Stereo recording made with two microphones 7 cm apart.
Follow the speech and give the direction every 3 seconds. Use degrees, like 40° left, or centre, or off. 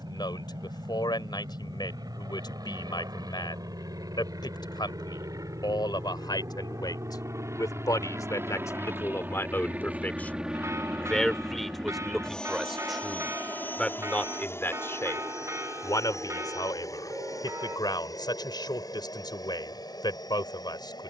80° left, 80° left, 60° left, 20° left, 10° left, 60° left, 70° left.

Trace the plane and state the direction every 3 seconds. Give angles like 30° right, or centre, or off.
70° right, 60° right, 40° right, 10° right, 20° left, 40° left, 60° left.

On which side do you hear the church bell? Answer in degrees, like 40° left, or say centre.
40° right.